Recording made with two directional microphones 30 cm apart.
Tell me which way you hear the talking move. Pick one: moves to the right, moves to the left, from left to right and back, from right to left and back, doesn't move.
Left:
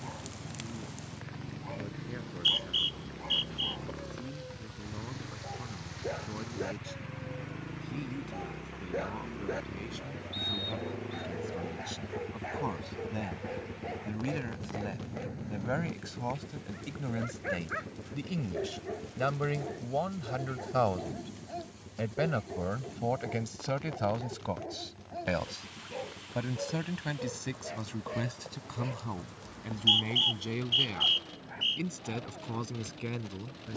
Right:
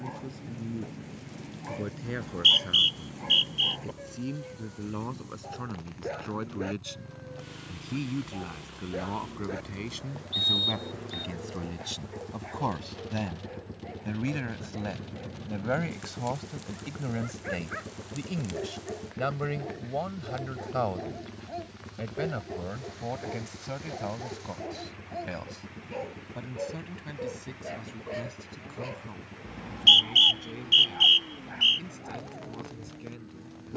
moves to the left.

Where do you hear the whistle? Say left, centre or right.
right.